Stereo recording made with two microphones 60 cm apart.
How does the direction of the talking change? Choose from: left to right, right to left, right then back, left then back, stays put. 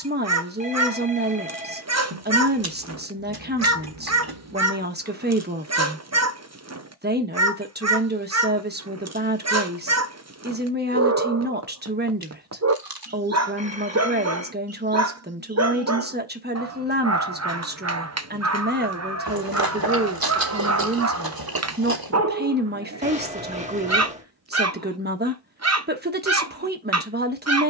stays put.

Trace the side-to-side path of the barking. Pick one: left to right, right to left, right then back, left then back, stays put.
stays put.